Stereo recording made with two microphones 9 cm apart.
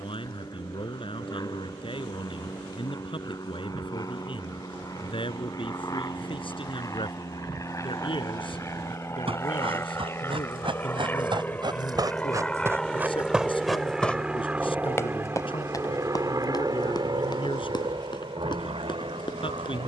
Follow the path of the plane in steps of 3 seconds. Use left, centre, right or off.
left, left, left, left, centre, right, right.